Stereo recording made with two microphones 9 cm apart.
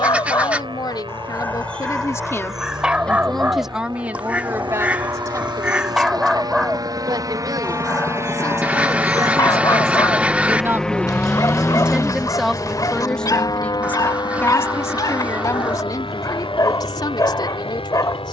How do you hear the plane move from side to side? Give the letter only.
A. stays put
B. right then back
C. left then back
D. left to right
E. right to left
E.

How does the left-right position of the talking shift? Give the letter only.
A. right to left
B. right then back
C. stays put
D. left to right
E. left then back
B.